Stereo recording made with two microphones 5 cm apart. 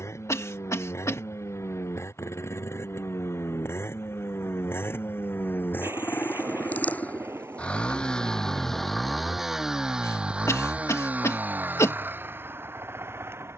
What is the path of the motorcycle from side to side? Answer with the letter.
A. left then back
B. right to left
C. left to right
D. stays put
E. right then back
C.